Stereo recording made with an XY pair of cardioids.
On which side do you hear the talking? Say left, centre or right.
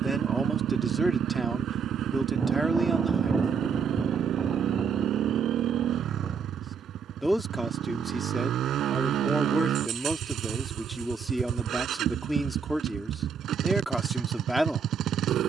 centre.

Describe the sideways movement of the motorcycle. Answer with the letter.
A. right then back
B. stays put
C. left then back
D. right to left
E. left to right
B.